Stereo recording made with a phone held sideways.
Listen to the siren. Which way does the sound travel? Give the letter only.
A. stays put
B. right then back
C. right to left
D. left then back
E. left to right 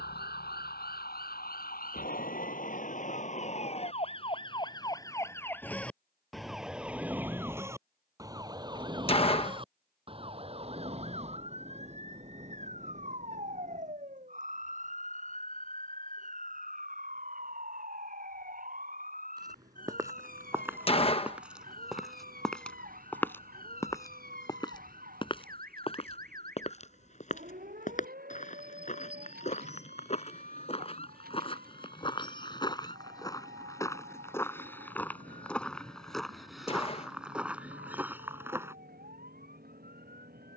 E.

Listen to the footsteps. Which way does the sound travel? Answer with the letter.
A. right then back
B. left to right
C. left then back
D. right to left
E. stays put
C.